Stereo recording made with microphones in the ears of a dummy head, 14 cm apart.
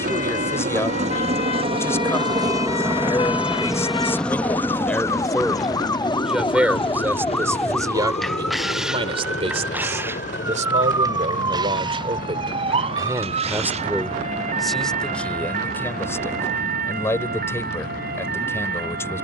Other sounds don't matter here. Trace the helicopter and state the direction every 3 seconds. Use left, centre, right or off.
right, centre, left, left, left, left, left.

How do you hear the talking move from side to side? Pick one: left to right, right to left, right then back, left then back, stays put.
right then back.